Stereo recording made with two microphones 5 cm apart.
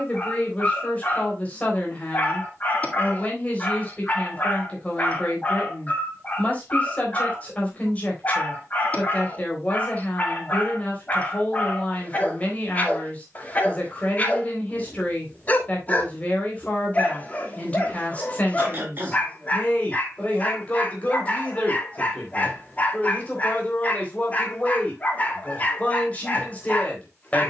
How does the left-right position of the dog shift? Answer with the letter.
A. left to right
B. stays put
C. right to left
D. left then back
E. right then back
B.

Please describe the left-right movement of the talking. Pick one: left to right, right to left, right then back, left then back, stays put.
stays put.